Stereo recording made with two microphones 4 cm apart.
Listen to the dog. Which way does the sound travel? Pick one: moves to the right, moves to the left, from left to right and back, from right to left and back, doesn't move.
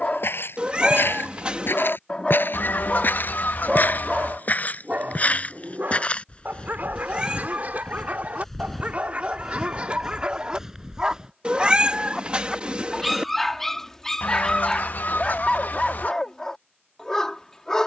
from left to right and back.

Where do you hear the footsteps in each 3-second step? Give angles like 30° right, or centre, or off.
60° left, 40° left, 20° left, 10° right, off, off.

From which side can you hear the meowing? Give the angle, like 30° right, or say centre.
30° right.